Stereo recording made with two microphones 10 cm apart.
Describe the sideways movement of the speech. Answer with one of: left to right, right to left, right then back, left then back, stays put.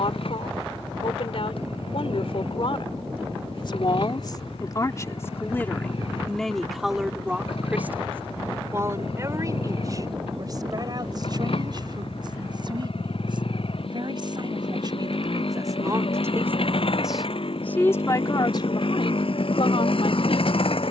right then back.